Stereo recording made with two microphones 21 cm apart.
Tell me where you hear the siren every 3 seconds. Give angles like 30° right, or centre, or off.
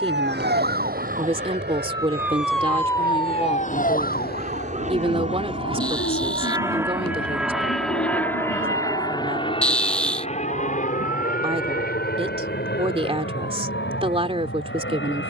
30° right, 50° left, 70° left, 80° left, 80° left.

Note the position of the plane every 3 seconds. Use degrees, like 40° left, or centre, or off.
60° right, 40° right, centre, 30° left, 50° left.